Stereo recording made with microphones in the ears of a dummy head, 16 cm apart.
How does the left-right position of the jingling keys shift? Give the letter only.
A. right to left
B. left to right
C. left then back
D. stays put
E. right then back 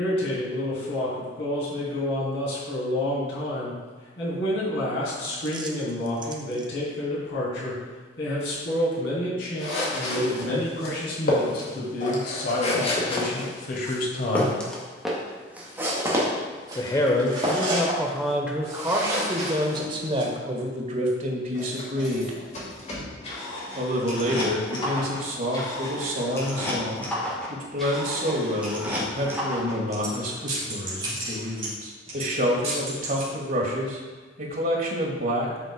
B.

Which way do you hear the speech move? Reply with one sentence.
In this clip you hear the speech move from left to right.